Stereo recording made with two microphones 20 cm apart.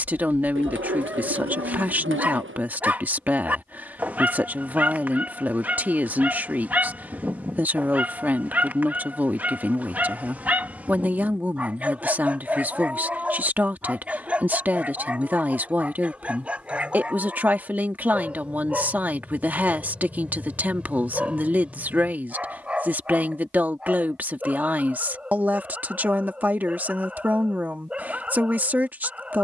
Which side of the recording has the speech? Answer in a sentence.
You can hear the speech in the centre.